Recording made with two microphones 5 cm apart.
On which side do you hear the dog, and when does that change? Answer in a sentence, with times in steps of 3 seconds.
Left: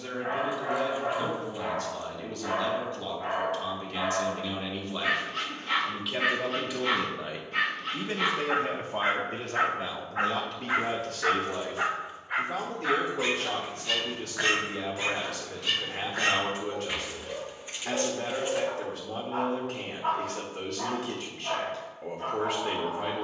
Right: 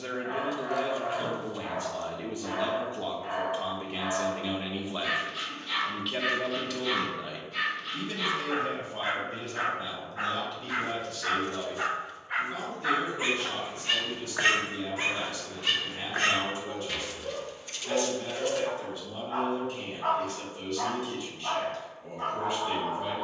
In this clip you hear the dog on the left from 0 s and on the right from 12 s.